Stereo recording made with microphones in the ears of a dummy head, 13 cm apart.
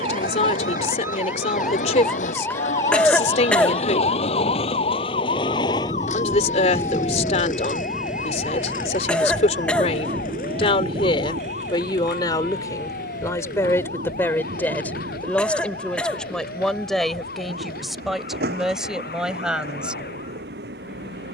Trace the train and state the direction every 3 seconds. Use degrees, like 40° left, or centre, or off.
60° left, 40° left, centre, 40° right, 60° right, 70° right, 80° right.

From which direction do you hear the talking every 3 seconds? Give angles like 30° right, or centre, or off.
50° left, 50° left, 50° left, 40° left, 20° left, centre, centre.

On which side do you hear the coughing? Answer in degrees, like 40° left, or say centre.
10° left.